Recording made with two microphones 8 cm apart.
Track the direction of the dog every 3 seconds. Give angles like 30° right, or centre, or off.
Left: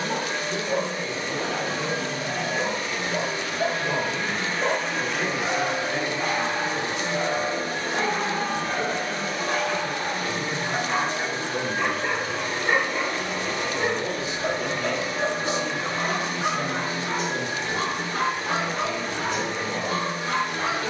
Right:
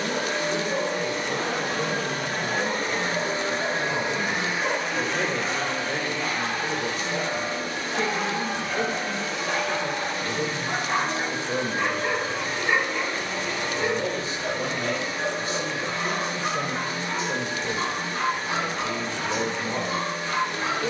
50° left, 40° left, 20° left, 10° right, 20° left, 50° left, 50° left.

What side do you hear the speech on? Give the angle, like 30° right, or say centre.
40° right.